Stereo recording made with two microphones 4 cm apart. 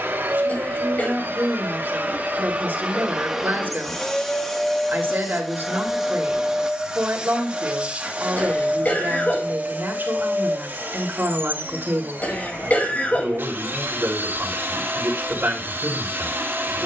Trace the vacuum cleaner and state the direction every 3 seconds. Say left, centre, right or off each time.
right, centre, right, right, right, right.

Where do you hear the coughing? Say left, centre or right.
left.